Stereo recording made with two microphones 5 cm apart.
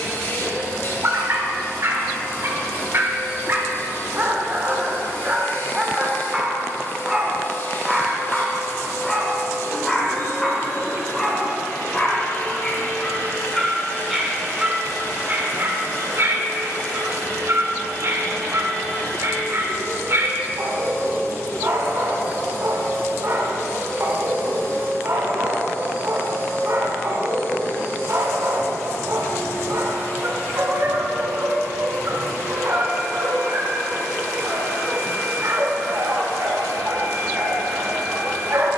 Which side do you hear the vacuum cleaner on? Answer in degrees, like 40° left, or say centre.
50° left.